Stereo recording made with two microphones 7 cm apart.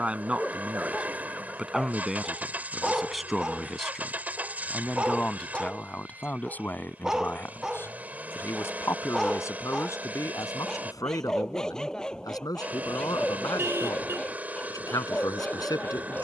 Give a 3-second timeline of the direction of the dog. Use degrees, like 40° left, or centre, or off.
10° left, 10° right, 10° right, 10° left, 10° left, 20° left.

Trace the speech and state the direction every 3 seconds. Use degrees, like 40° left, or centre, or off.
10° right, 10° left, 30° left, 50° left, 60° left, 60° left.